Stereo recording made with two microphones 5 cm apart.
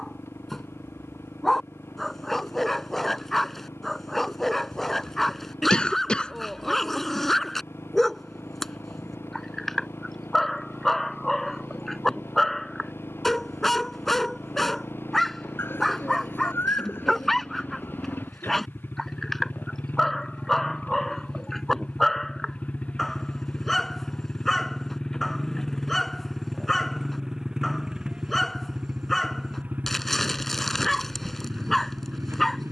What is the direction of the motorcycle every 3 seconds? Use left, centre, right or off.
left, left, left, left, left, left, left, left, centre, right, right.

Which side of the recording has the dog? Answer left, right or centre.
centre.